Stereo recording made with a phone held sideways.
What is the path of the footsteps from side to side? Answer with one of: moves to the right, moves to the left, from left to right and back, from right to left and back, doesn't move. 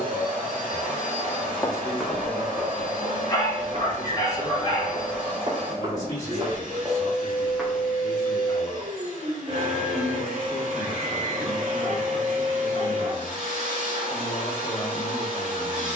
from left to right and back.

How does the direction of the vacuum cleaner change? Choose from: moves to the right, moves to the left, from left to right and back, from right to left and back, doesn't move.
doesn't move.